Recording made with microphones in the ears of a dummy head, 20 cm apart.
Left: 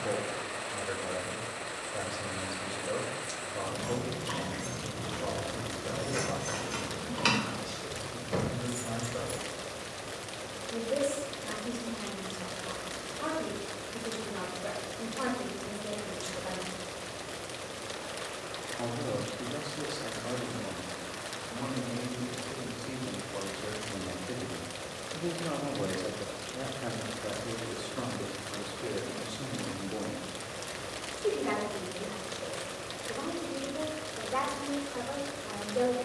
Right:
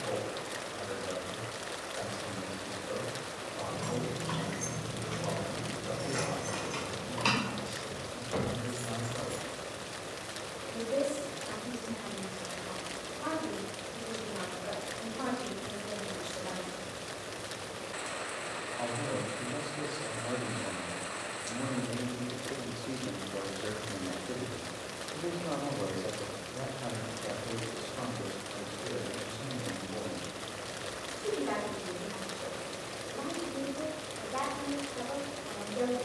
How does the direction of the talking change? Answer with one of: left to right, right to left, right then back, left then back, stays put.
right then back.